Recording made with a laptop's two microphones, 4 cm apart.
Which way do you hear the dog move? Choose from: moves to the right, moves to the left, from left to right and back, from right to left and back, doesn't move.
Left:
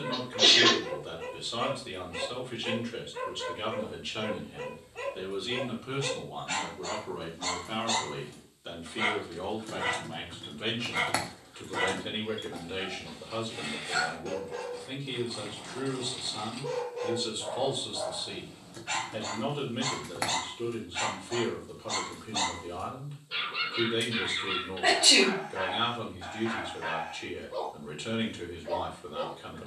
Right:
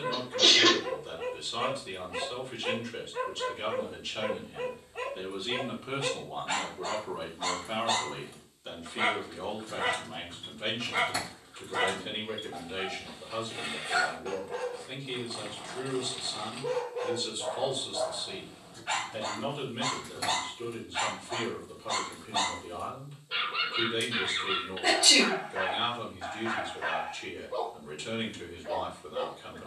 doesn't move.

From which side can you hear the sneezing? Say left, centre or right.
left.